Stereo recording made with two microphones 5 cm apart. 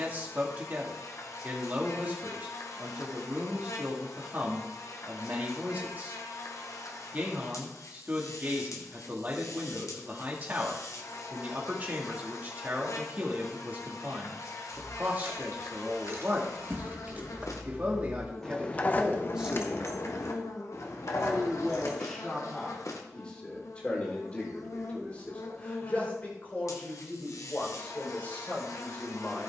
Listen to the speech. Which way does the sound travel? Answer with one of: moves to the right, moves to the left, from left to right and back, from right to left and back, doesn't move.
moves to the left.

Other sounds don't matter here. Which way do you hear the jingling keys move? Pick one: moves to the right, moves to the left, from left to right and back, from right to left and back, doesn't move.
moves to the left.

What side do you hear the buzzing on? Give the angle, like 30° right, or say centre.
70° left.